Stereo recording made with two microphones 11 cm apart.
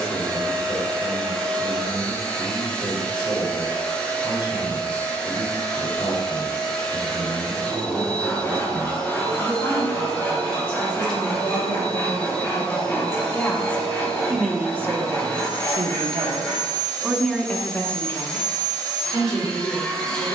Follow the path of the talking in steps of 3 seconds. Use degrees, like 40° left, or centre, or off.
50° left, 50° left, 50° left, 50° left, 10° left, 20° right, 40° left.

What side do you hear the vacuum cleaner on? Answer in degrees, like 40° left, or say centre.
10° left.